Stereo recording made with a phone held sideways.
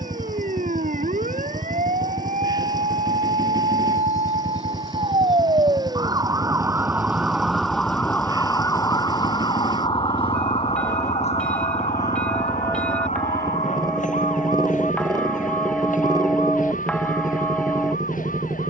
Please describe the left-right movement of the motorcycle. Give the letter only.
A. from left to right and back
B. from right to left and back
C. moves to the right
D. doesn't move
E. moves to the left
D.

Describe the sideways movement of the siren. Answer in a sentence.
In this clip you hear the siren travel towards the left.